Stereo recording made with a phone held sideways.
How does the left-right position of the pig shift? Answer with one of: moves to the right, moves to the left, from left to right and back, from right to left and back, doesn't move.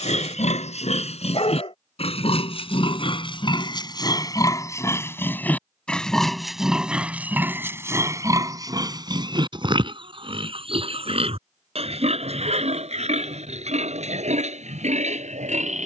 moves to the right.